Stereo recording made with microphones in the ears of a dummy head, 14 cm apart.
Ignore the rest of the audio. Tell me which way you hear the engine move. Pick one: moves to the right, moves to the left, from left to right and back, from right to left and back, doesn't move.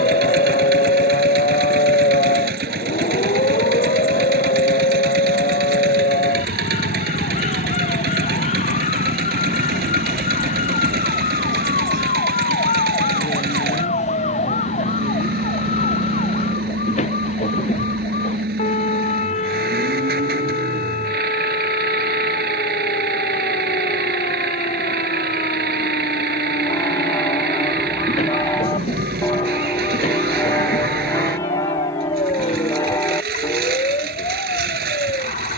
doesn't move.